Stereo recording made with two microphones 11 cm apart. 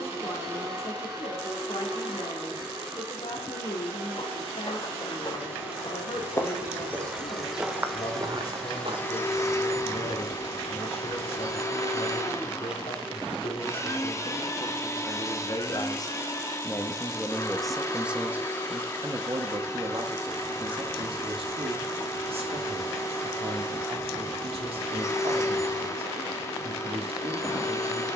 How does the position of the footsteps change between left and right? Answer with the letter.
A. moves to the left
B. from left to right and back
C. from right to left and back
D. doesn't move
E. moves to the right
E.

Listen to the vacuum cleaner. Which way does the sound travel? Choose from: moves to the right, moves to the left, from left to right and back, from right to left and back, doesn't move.
moves to the left.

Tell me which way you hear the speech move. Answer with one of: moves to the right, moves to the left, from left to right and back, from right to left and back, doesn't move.
moves to the right.